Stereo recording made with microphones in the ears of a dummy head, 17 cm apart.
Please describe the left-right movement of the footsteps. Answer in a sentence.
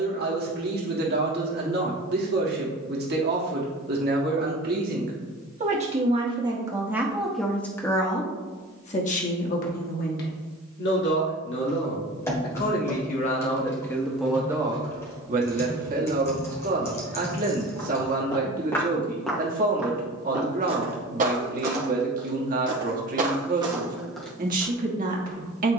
You can hear the footsteps move from left to right and back again.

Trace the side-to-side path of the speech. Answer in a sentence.
In this clip you hear the speech move from right to left and back again.